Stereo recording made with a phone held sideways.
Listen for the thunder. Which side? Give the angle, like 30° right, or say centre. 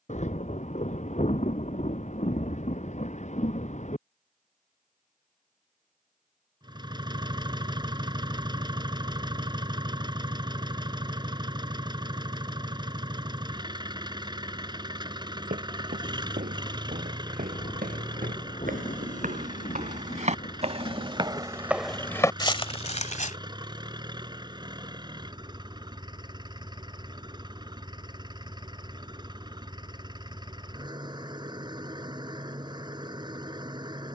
50° left.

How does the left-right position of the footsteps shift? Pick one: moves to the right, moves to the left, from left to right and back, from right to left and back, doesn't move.
moves to the left.